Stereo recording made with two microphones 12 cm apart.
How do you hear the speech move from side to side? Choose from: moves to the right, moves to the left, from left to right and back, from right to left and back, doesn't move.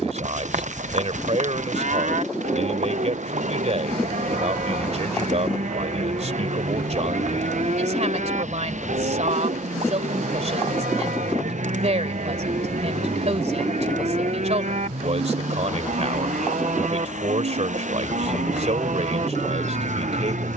doesn't move.